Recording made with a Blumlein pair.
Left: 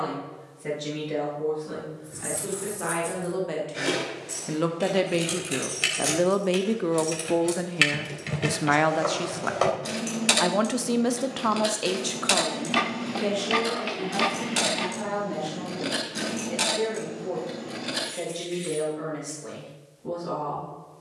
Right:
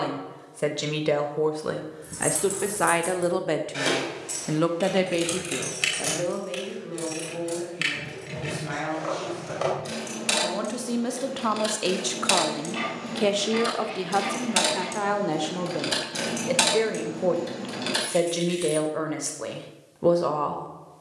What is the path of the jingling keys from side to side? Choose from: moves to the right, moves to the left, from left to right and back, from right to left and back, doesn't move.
from right to left and back.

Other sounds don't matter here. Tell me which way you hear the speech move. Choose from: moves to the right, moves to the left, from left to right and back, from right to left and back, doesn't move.
from right to left and back.